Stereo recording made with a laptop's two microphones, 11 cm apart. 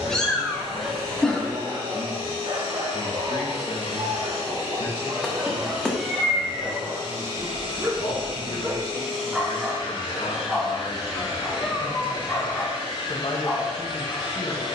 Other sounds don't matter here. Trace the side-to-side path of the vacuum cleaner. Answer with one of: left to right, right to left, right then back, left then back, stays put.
stays put.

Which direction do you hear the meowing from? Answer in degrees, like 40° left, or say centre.
10° left.